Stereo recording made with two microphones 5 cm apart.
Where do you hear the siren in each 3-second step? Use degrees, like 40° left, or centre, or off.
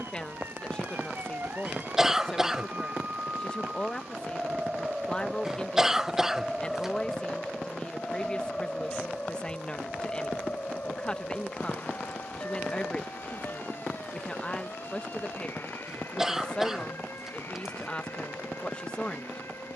50° right, 20° right, 10° left, 30° left, 40° left, 50° left, 50° left.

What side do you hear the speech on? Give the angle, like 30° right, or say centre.
20° left.